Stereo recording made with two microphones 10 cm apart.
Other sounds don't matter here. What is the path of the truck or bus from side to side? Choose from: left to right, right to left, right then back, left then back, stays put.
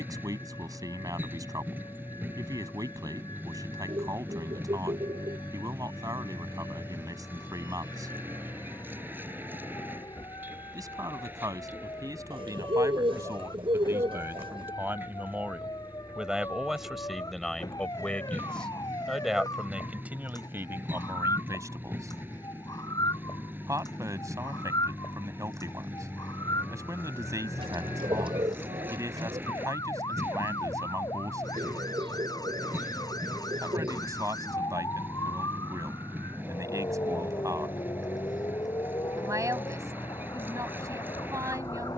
stays put.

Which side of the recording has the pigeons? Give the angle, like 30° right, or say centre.
60° right.